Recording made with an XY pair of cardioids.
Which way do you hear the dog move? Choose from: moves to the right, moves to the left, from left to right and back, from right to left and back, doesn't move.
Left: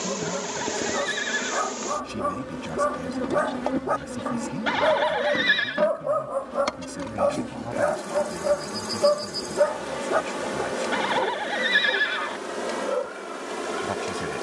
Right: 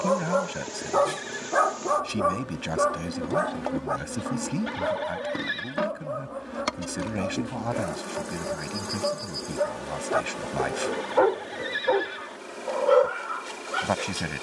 from right to left and back.